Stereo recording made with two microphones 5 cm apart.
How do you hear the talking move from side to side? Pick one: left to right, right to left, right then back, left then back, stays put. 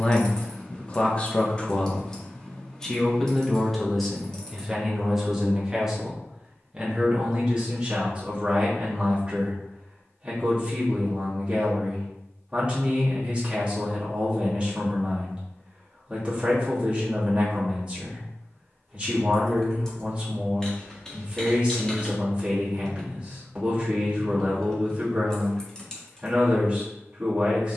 left to right.